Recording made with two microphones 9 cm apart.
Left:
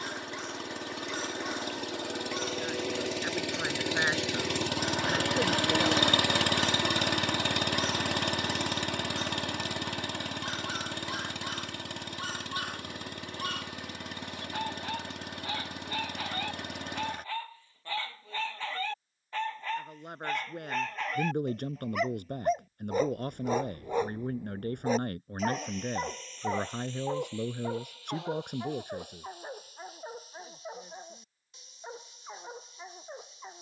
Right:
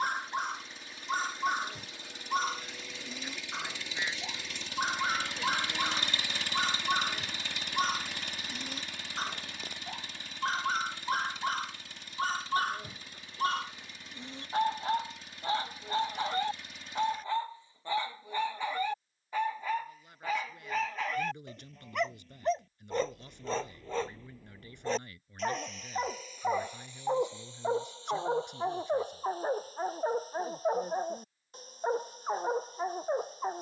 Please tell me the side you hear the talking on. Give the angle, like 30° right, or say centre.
60° left.